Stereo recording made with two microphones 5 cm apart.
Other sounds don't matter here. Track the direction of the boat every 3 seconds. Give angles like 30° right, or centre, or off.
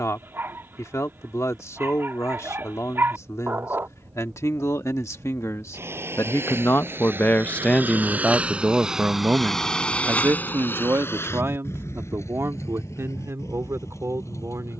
70° right, 60° right, 40° right, 40° left, 80° left.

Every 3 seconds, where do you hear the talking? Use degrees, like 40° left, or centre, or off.
80° left, 80° left, 30° left, 50° right, 60° right.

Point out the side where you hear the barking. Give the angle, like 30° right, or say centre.
50° right.